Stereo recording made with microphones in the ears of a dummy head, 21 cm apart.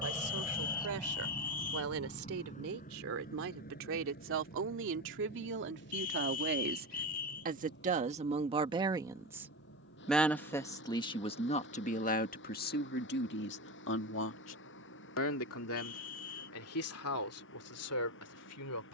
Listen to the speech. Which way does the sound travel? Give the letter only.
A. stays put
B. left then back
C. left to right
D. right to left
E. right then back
D.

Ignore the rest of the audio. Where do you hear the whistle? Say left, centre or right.
left.